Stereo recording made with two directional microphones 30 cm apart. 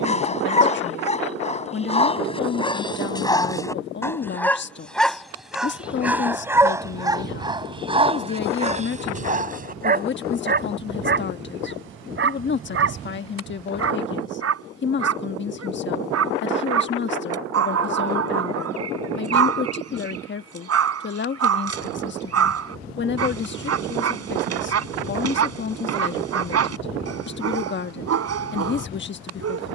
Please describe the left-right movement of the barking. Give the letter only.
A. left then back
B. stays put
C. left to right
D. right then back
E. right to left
C.